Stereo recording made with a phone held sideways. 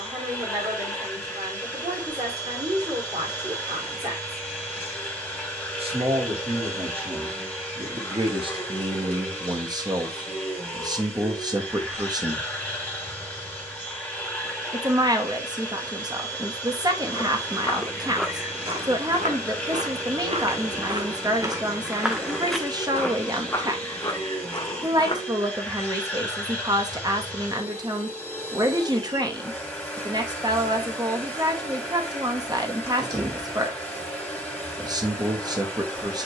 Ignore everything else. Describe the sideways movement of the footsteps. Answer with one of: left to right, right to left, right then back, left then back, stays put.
right then back.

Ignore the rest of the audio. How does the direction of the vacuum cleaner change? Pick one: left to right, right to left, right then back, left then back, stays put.
stays put.